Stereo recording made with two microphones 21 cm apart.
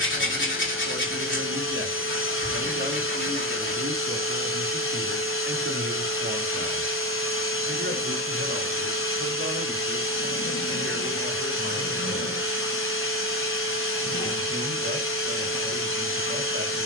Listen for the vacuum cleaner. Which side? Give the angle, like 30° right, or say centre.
80° left.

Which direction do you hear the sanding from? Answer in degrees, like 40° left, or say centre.
60° left.